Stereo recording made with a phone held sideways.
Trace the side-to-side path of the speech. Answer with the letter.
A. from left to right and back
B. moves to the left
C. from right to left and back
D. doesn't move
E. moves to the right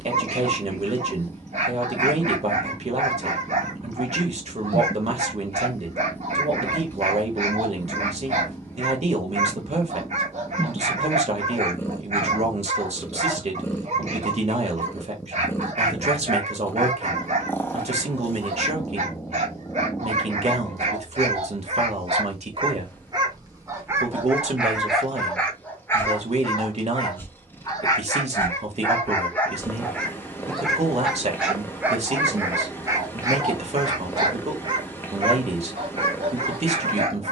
D.